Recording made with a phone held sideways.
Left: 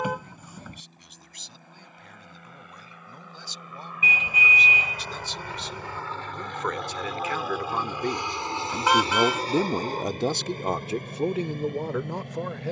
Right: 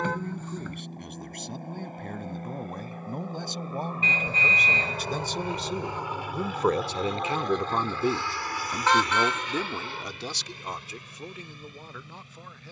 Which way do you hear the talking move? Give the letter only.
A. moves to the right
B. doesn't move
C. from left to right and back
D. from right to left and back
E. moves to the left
E.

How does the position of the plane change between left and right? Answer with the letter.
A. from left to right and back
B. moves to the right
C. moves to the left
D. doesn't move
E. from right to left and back
C.